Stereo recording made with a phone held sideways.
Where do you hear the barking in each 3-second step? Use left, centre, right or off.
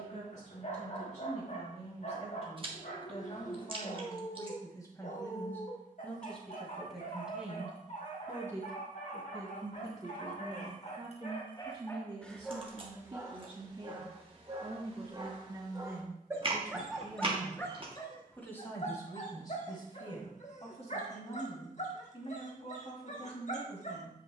left, left, left, left, right, centre, left, left.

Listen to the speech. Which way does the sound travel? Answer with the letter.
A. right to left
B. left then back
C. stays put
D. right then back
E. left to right
D.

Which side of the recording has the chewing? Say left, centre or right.
right.